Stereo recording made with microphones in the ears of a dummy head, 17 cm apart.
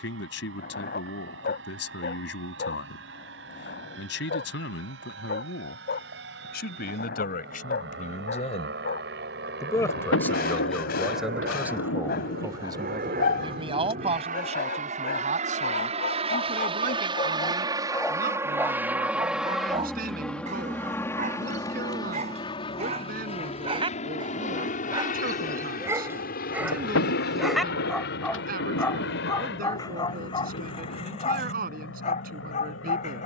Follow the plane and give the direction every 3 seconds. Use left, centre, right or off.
right, right, right, right, right, right, centre, left, left, left, left.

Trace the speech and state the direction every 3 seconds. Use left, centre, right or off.
left, left, left, centre, right, right, right, right, right, right, right.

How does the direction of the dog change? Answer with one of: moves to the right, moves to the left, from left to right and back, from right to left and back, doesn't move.
from left to right and back.